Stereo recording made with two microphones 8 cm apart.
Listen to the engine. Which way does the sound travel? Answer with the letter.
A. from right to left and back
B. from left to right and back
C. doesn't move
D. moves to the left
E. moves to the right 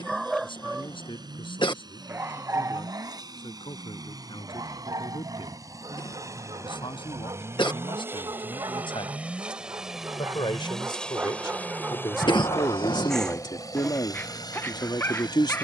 D.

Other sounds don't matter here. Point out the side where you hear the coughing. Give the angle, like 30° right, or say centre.
70° left.